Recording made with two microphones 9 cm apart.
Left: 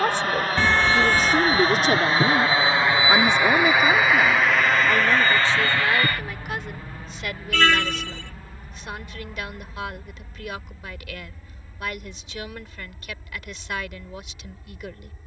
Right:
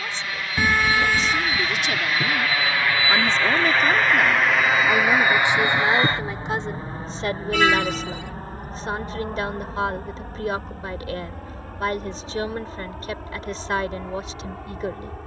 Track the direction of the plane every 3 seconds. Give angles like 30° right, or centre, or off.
40° left, centre, 40° right, 50° right, 60° right.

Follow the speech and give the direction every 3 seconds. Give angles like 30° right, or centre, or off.
50° left, centre, 30° right, 40° right, 40° right.